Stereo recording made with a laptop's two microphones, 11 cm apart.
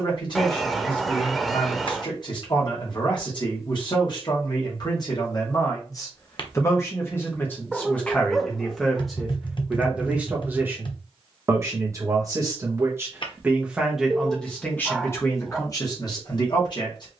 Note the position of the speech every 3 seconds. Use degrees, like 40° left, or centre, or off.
50° left, 40° left, 20° left, 20° right, 10° right, 40° left.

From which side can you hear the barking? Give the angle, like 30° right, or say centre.
centre.